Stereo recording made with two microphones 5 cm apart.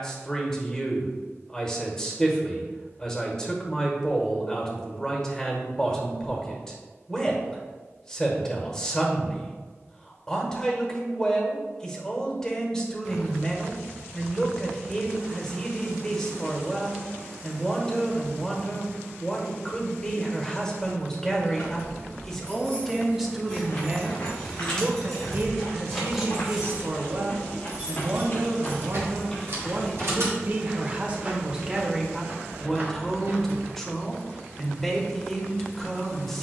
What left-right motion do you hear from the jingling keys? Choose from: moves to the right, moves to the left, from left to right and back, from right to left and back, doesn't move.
moves to the right.